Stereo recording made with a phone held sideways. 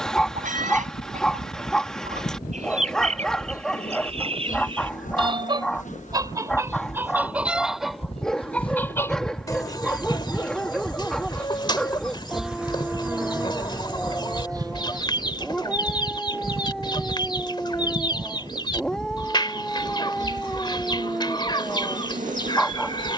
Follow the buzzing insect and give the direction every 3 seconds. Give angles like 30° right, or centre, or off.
70° left, 60° left, 40° left, 20° left, 10° right, 40° right, 50° right, 60° right.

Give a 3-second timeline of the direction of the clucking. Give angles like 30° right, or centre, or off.
50° right, 40° right, 10° right, 30° left, 30° left, 30° left, 30° left, 30° left.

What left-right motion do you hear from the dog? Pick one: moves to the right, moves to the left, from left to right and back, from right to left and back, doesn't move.
doesn't move.